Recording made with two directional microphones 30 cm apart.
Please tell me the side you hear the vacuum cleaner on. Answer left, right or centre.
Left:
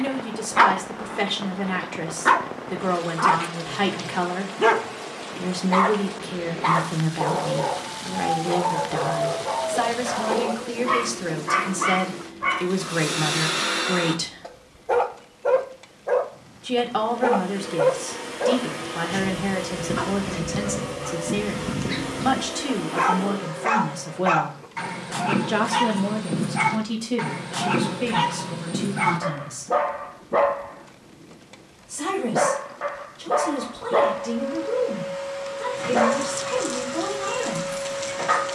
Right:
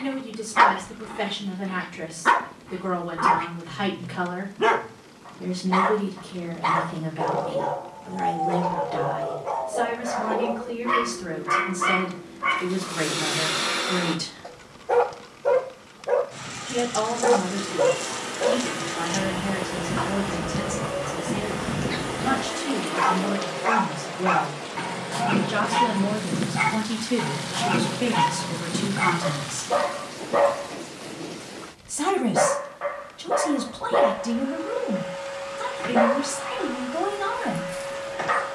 centre.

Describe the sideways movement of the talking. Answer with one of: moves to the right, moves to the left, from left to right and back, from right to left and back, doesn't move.
moves to the right.